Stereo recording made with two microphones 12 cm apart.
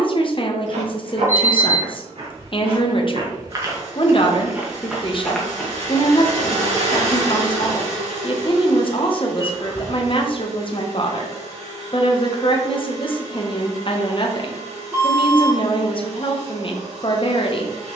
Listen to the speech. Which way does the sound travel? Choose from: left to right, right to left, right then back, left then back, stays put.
stays put.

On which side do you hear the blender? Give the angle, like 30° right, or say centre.
60° right.